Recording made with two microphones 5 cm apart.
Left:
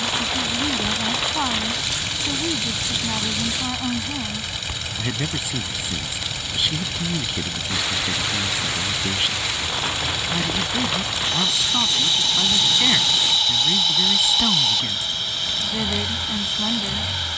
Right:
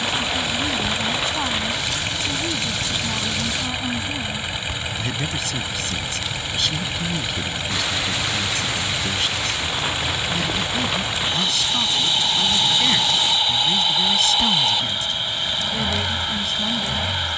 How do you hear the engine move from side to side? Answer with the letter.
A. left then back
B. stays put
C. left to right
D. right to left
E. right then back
B.